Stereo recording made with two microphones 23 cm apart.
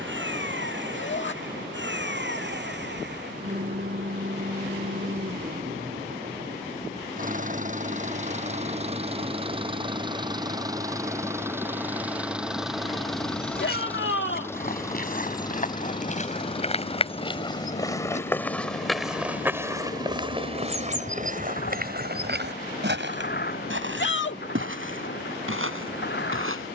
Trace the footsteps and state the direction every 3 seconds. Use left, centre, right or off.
off, off, off, off, left, left, centre, right, right.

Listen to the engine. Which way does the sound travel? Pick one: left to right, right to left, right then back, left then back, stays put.
right to left.